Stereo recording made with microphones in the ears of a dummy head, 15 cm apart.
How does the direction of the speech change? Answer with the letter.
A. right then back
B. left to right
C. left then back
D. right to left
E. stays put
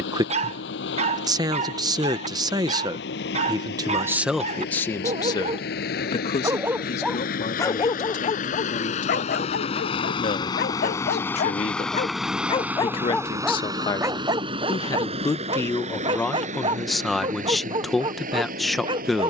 C.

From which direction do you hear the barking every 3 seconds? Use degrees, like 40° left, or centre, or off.
40° right, 40° right, 10° left, 60° left, centre, 30° right, 30° right.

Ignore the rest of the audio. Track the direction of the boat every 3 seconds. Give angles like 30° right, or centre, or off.
80° left, 70° left, 60° left, 20° left, 20° right, 50° right, 60° right.